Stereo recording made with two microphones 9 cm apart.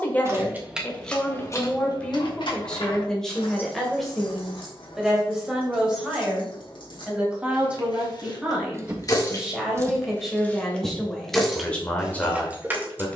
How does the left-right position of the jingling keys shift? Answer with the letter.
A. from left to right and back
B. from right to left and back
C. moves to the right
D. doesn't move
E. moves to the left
B.